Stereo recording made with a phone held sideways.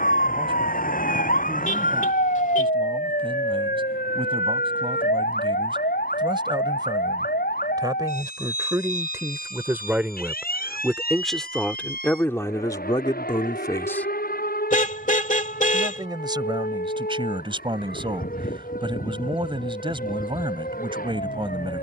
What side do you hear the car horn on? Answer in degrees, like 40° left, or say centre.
50° left.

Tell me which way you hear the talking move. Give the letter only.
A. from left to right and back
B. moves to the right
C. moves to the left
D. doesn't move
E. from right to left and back
E.